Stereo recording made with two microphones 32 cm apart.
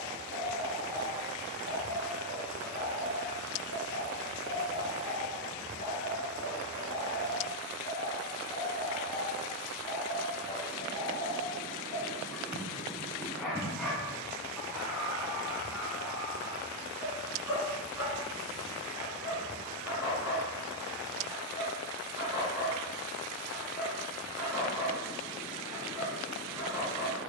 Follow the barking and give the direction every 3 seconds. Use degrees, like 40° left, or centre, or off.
70° left, 50° left, 30° left, 20° left, centre, 10° right, 10° right, 10° right, 10° right.